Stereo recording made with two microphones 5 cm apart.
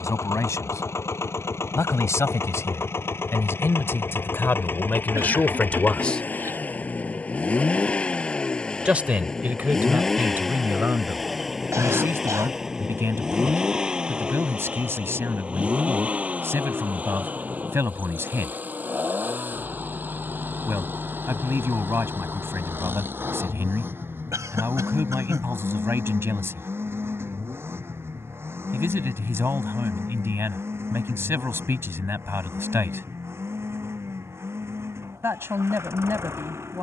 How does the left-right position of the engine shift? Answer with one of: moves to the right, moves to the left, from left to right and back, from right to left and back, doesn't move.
moves to the right.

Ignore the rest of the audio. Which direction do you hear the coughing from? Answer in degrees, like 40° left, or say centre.
70° right.